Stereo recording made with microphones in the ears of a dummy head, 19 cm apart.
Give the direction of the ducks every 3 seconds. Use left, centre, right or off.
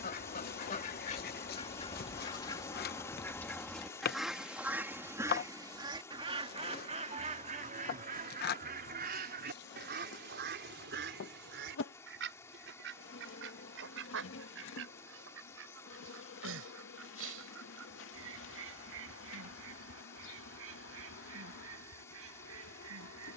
left, centre, right, right, right, right, right, right.